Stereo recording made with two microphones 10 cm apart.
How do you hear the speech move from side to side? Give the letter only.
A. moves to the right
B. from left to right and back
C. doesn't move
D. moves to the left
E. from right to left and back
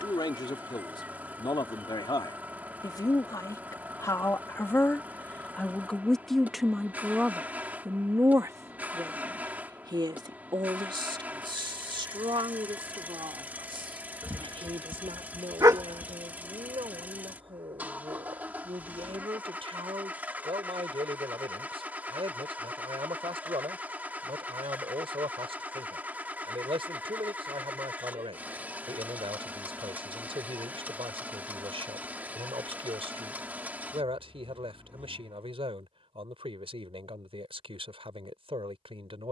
A.